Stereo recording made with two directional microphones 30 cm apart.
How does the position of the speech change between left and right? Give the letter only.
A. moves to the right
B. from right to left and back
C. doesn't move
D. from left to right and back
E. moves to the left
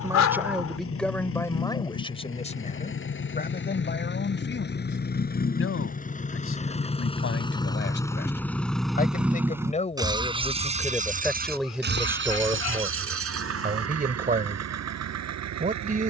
B.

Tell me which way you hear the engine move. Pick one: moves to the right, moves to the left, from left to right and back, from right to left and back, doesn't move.
moves to the right.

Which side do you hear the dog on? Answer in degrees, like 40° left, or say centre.
60° left.